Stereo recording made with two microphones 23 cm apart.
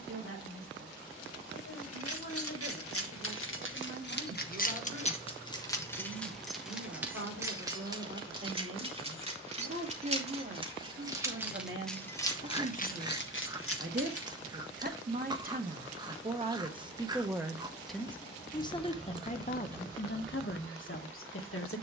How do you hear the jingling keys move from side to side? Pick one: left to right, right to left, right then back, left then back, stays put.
right then back.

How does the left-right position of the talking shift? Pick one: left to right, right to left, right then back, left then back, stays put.
right to left.